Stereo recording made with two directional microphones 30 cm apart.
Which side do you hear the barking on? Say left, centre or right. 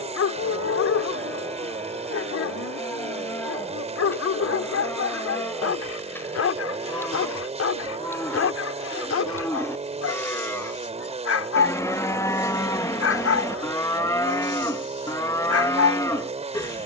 left.